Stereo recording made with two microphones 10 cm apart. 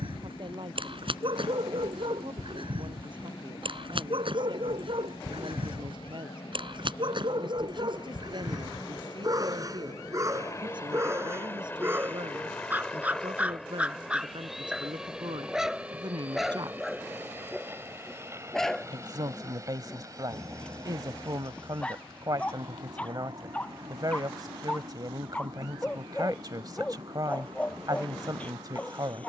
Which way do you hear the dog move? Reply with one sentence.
In this clip you hear the dog move from right to left.